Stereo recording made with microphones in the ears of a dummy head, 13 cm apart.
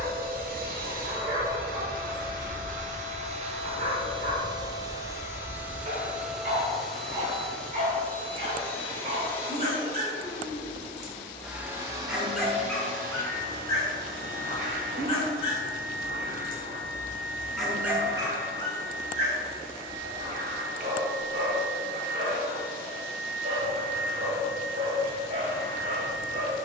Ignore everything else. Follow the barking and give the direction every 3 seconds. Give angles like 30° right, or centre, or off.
50° right, 50° right, 50° right, 40° right, 10° left, 30° left, 40° right, 40° right, 40° right.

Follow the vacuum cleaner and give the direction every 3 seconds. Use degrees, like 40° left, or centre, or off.
60° right, 30° right, 10° left, 10° left, 50° right, 60° right, 60° right, 60° right, 60° right.